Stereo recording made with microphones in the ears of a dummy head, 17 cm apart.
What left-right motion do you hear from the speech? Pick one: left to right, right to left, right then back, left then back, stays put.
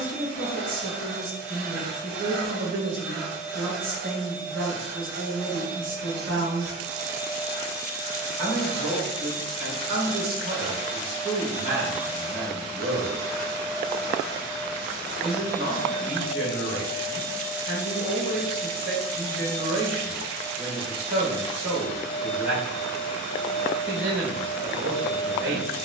stays put.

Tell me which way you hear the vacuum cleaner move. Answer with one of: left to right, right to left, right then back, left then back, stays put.
right to left.